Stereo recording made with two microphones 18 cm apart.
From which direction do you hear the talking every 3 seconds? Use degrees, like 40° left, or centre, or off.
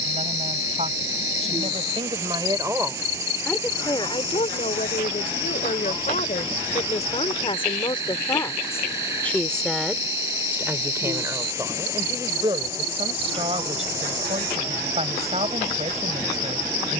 30° right, 40° left, 30° left, 10° right, 30° right, 40° right.